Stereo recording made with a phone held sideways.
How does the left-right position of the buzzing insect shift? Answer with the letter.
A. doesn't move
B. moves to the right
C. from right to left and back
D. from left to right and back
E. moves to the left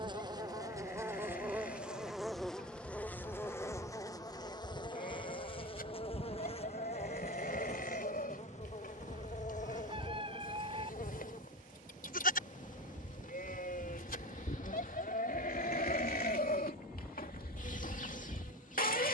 E.